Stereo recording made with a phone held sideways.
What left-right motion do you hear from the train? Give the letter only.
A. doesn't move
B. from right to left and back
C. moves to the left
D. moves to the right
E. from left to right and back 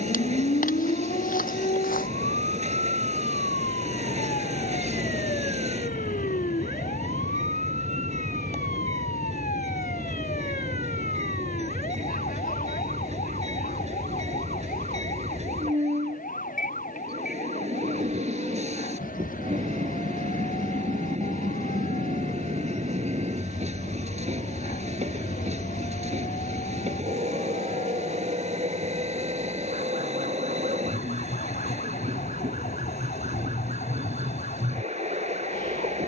A.